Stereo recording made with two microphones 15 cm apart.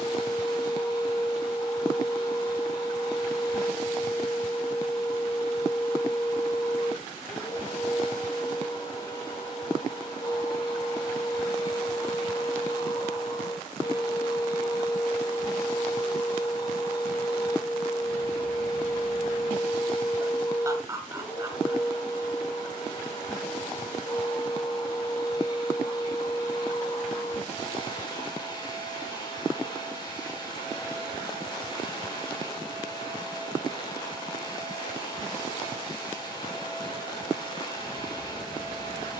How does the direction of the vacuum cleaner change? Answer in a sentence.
In this clip you hear the vacuum cleaner stay put.